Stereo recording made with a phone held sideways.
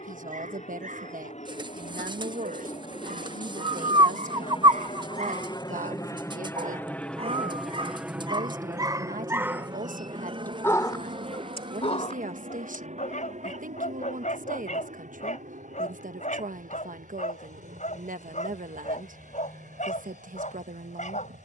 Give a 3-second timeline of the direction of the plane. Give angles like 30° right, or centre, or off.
60° left, 40° left, centre, 40° right, 60° right, 70° right, 70° right.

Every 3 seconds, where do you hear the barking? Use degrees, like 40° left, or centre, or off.
70° right, 60° right, 40° right, 10° left, 70° left, 70° left, 70° left.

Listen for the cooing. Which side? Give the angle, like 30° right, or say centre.
40° right.